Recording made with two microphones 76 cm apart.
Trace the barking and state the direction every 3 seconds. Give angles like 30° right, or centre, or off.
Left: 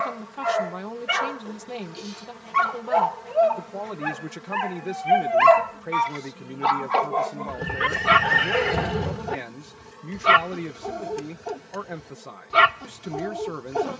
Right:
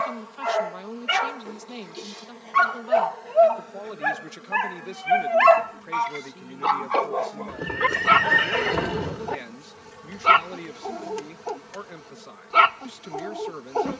50° right, 10° right, 40° left, 50° left, 50° left.